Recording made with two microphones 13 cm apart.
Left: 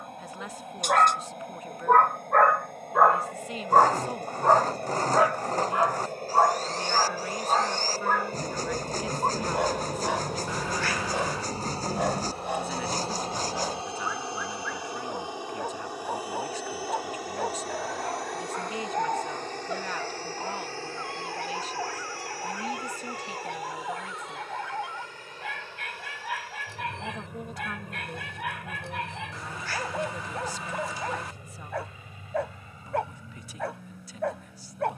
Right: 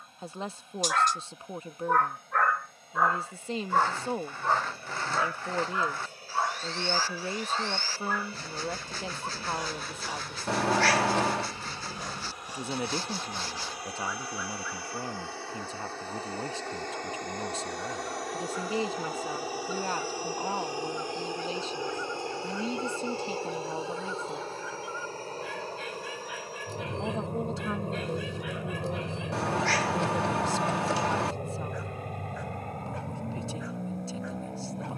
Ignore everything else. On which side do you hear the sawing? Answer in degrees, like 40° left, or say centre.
40° left.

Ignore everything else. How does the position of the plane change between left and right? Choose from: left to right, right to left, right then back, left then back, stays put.
left to right.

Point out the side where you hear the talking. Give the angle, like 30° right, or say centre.
30° right.